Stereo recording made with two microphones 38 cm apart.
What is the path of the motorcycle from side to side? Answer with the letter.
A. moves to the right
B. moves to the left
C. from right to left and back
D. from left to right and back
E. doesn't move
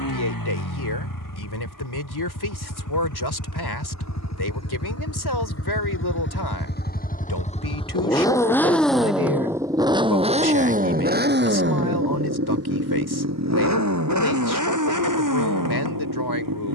A.